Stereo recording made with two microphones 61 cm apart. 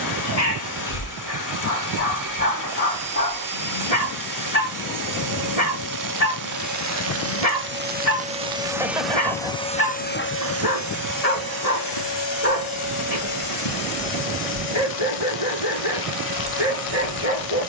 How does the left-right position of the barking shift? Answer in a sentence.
You can hear the barking stay put.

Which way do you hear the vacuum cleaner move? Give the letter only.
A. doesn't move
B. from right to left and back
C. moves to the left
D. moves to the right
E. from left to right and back
C.